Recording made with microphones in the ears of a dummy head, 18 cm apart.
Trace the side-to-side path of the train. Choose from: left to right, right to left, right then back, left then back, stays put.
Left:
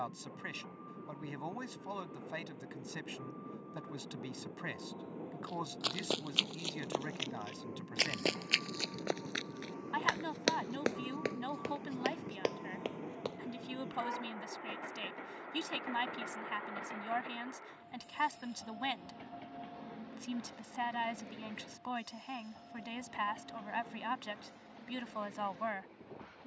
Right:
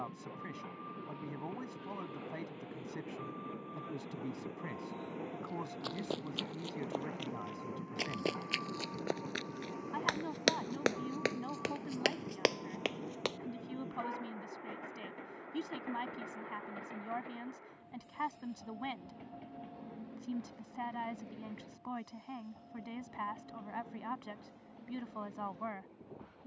right to left.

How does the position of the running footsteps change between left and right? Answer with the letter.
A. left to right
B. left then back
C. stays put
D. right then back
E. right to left
A.